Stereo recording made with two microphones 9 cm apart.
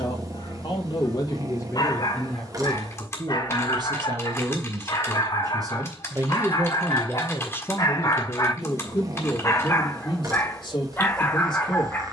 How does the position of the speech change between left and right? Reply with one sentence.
You can hear the speech move from left to right and back again.